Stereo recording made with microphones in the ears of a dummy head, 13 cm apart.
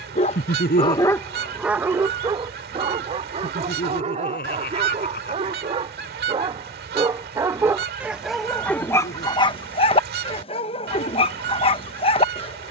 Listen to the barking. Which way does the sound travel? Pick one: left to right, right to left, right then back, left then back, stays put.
right then back.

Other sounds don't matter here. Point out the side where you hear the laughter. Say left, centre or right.
left.